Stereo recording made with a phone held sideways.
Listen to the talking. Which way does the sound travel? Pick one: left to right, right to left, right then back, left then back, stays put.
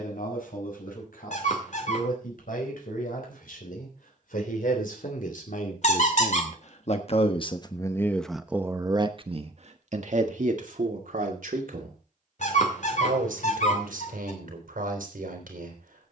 left to right.